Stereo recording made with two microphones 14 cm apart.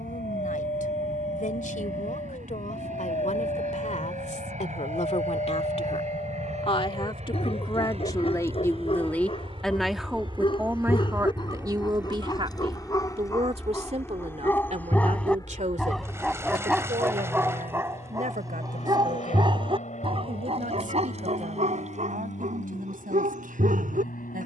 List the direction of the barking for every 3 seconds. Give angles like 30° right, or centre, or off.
50° left, 50° left, 40° left, 40° left, 20° left, 10° right, 40° right, 60° right.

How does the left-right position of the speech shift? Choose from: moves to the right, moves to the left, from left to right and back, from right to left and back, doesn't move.
moves to the right.